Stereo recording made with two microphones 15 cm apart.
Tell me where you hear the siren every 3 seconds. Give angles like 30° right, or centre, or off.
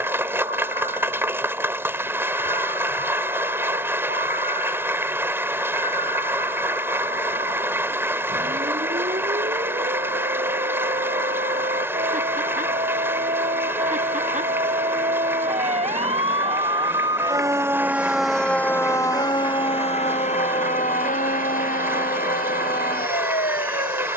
80° right, 80° right, 70° right, 70° right, 60° right, 40° right, 30° left, 70° left.